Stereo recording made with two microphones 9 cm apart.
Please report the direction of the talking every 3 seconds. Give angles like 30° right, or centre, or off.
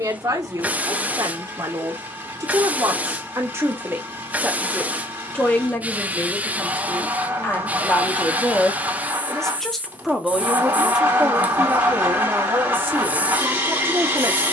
40° right, 10° right, 20° left, 10° right, 30° right.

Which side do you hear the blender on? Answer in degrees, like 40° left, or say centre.
20° right.